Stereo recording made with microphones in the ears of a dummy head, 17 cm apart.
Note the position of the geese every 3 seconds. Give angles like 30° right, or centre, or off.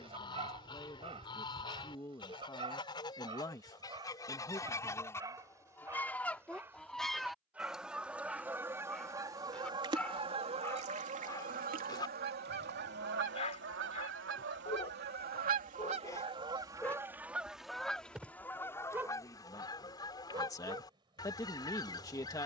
20° left, 20° left, centre, 30° right, 60° right, 20° right, 20° left, 20° left.